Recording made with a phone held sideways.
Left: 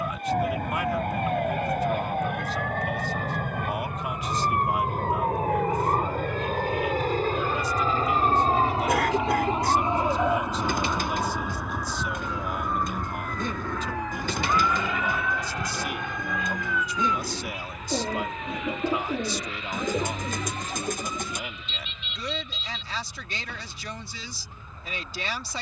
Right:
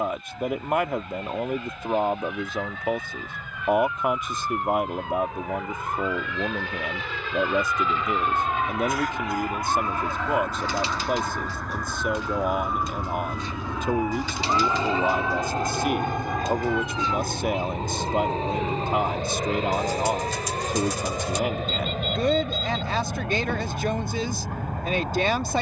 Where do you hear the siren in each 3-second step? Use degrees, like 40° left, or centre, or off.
60° left, 50° left, 30° left, 10° left, centre, 20° right, 40° right, 40° right, 50° right.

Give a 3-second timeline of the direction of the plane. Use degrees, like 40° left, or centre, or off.
70° left, 60° left, 40° left, 20° left, 10° right, 40° right, 50° right, 60° right, 60° right.